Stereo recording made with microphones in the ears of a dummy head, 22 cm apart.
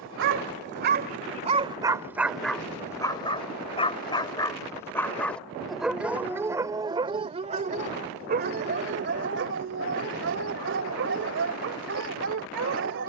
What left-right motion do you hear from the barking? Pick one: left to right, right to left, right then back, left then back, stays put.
left then back.